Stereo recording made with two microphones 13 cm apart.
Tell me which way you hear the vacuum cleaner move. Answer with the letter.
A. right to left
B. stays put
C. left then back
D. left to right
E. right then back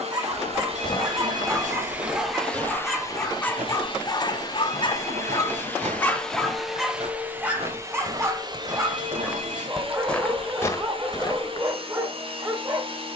C.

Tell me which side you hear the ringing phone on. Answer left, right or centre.
right.